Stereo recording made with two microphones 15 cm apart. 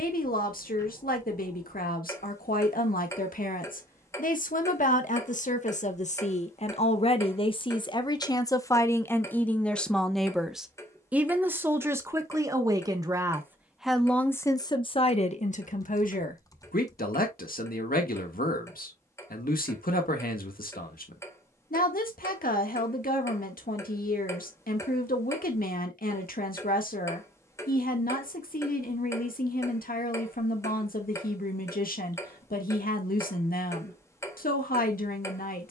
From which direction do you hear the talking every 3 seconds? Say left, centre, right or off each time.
left, left, left, centre, centre, left, left, left, left, left, left, left.